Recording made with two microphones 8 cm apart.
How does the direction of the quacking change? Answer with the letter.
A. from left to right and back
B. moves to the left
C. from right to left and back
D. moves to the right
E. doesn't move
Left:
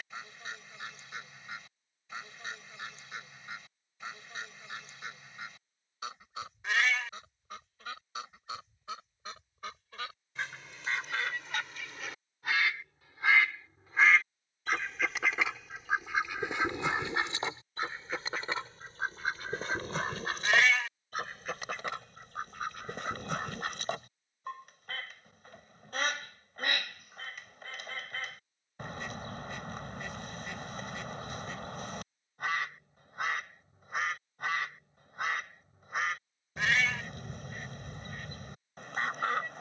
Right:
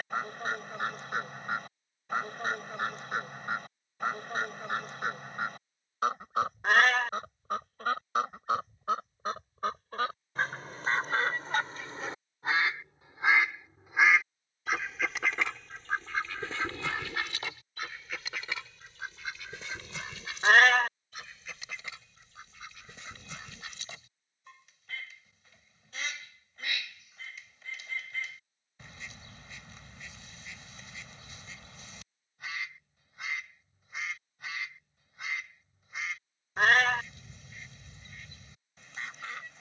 B.